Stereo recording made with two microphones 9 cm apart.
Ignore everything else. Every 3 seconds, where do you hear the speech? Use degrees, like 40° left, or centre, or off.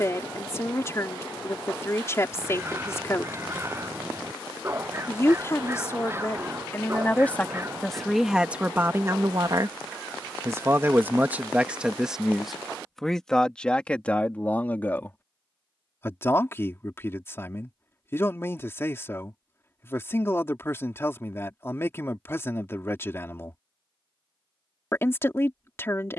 30° left, 30° left, 10° left, 30° right, 10° left, 30° left, 30° left, 30° left, 30° left.